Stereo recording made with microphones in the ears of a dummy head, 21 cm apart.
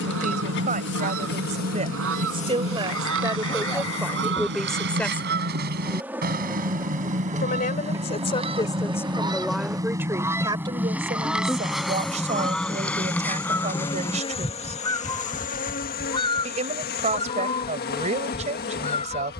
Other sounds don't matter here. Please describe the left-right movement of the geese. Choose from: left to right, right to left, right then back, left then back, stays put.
right to left.